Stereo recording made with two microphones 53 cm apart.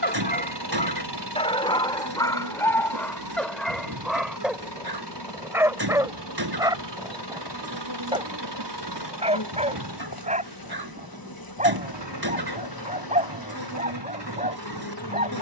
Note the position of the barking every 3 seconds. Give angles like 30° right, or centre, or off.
10° left, centre, 10° right, 10° right, 10° right.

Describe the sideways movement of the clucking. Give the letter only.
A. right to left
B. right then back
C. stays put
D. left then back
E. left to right
C.